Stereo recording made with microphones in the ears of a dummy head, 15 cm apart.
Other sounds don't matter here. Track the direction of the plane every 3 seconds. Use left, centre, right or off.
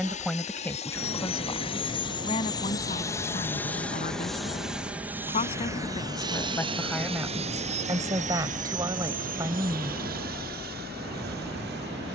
left, centre, right, right.